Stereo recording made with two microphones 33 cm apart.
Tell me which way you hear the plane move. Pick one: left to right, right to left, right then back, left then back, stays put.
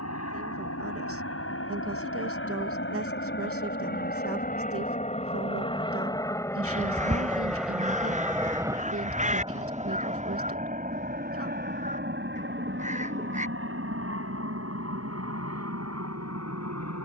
left to right.